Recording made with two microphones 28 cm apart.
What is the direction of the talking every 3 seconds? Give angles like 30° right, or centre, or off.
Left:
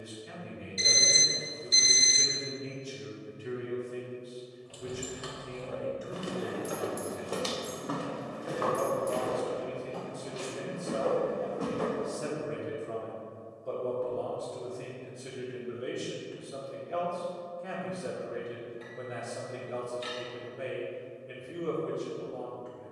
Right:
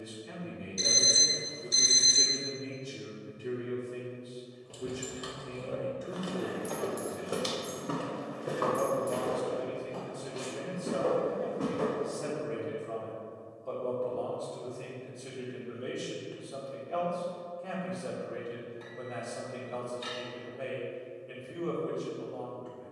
40° right, 40° right, 40° right, 10° right, 20° left, 20° left, 20° left, 20° left.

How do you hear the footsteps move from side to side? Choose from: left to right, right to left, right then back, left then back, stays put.
left to right.